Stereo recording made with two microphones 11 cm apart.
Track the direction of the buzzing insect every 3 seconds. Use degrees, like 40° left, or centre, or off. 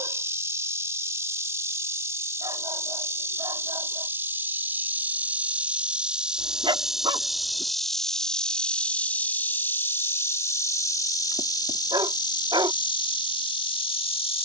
20° right, 20° right, centre, 20° left, 50° left.